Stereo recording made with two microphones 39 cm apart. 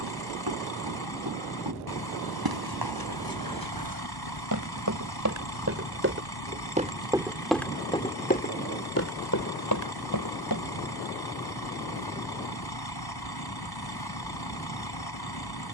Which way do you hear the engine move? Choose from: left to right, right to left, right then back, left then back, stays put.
stays put.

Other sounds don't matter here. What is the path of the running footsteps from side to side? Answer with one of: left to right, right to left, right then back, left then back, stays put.
right to left.